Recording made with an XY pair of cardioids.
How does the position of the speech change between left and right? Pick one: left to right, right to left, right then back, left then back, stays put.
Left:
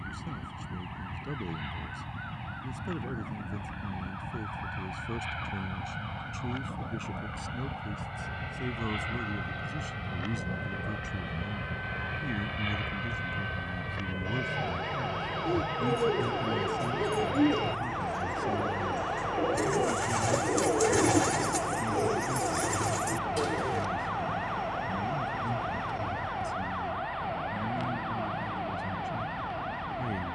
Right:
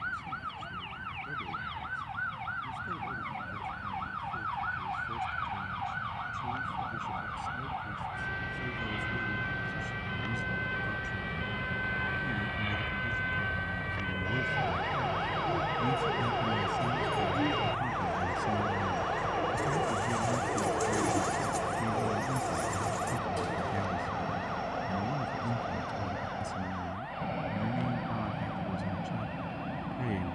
left to right.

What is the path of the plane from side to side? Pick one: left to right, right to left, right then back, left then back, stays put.
left to right.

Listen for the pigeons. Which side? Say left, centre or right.
left.